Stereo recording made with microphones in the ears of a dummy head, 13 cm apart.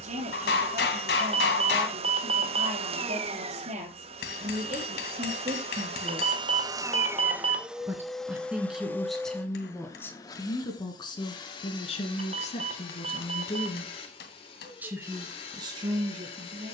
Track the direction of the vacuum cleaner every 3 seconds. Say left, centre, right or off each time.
right, right, centre, left, left, left.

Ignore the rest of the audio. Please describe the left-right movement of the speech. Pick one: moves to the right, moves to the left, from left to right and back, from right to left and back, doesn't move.
from right to left and back.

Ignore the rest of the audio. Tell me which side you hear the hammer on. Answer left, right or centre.
left.